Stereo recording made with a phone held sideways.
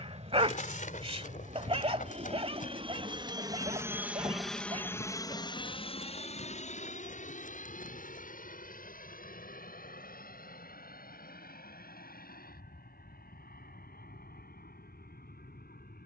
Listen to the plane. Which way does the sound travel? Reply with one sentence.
In this clip you hear the plane travel towards the left.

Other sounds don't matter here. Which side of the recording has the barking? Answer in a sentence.
You can hear the barking on the right.